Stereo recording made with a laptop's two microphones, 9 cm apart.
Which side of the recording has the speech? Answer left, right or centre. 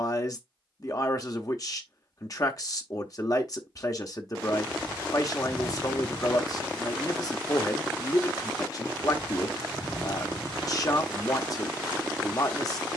left.